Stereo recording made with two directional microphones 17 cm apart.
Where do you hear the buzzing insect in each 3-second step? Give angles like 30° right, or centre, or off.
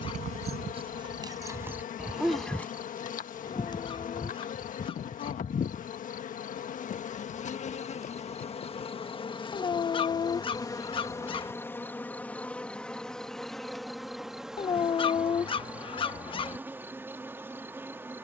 50° left, 50° left, 40° left, 20° left, centre, 10° right.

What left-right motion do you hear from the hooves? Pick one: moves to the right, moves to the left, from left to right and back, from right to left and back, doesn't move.
moves to the left.